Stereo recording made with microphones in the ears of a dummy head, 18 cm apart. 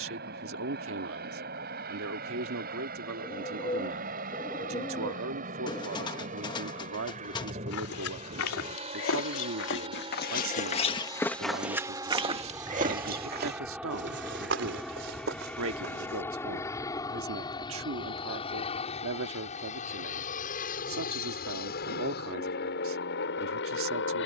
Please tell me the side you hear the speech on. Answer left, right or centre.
right.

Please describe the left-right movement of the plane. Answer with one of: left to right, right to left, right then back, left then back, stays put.
right to left.